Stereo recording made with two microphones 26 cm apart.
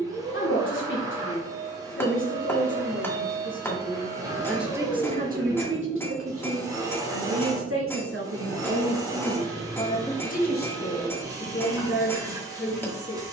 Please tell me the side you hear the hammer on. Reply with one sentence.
You can hear the hammer in the centre.